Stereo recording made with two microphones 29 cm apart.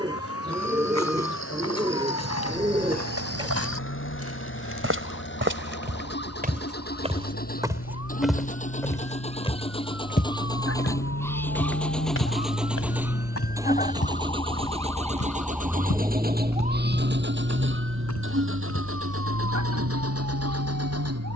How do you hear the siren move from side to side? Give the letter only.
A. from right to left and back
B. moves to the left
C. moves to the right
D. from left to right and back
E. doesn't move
C.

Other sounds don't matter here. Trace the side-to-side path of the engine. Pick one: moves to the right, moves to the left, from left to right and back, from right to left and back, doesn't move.
moves to the right.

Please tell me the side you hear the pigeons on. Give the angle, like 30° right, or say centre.
20° right.